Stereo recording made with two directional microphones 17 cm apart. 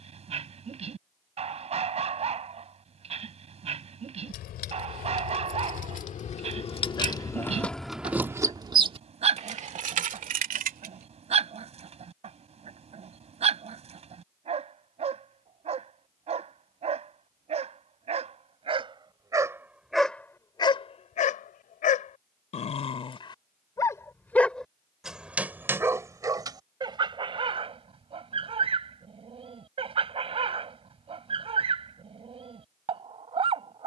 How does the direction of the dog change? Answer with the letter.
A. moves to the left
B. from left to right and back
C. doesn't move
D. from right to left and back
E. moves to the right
D.